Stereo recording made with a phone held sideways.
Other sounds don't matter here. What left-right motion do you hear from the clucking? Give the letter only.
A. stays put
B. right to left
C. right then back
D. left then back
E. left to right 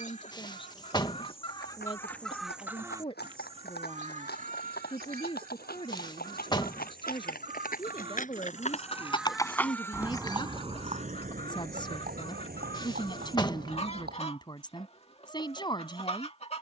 C.